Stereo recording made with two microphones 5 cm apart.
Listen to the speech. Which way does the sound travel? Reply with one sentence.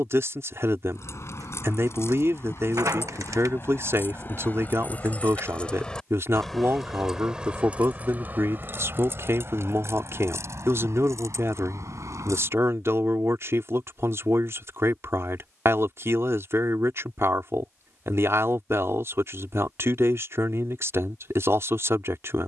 You can hear the speech stay in one place.